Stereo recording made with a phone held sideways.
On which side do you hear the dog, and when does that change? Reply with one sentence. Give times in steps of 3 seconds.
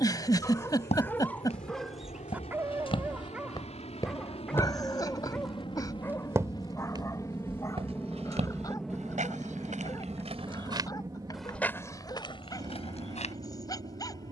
You can hear the dog in the centre from 0 s and on the left from 6 s.